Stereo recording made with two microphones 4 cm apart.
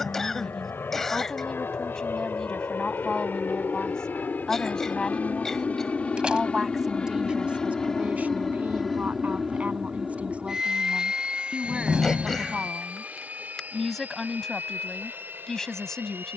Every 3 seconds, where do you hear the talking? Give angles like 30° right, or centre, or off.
20° left, 20° left, 20° right, 30° right, centre, 10° left.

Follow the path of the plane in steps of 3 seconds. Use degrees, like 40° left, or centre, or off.
60° left, 40° left, 20° left, 10° right, 30° right, 50° right.